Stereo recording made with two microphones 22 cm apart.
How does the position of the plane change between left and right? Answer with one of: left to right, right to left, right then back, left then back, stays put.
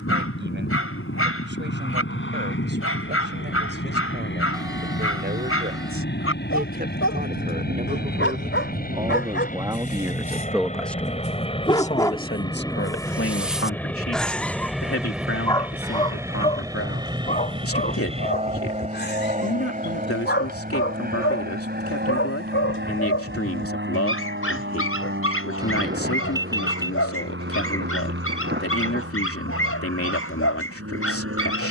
left to right.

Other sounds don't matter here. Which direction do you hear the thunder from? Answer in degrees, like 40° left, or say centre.
50° right.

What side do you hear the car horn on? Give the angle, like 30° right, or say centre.
20° right.